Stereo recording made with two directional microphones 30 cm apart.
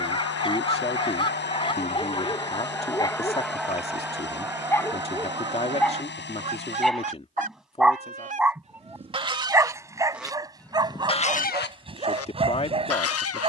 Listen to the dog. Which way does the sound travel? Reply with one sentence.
You can hear the dog move to the right.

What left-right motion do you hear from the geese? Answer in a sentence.
In this clip you hear the geese move from left to right and back again.